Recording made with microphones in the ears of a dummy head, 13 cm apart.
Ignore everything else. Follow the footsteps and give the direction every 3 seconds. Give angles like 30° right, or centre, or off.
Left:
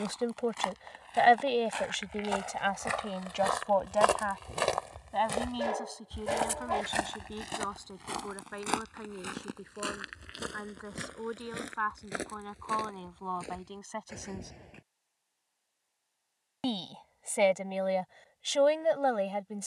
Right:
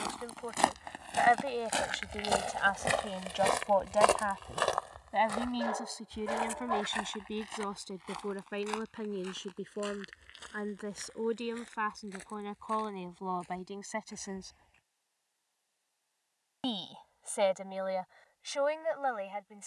50° right, centre, 60° left, 70° left, 70° left, off, off.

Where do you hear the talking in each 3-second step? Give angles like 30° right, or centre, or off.
30° left, centre, 20° right, 30° right, 20° right, 20° left, 40° left.